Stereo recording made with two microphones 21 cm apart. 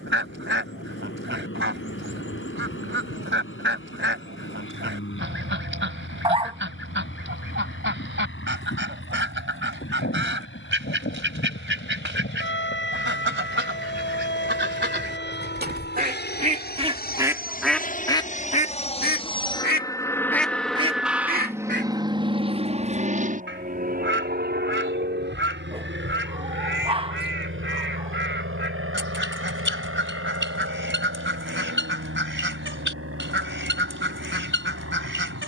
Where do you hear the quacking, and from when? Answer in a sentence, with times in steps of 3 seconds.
You can hear the quacking on the right from 0 s, on the left from 18 s and on the right from 21 s.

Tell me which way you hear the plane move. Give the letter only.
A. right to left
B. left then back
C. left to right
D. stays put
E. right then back
C.